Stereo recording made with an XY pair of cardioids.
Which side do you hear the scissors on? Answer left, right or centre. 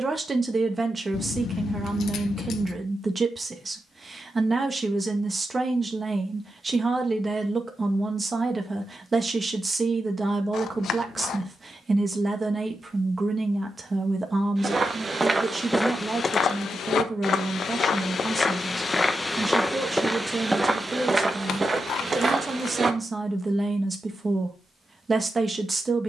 left.